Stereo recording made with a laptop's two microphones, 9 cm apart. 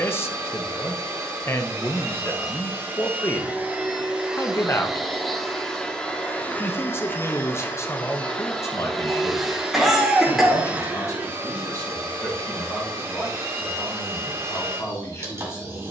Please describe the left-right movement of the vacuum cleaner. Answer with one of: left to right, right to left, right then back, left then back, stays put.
left then back.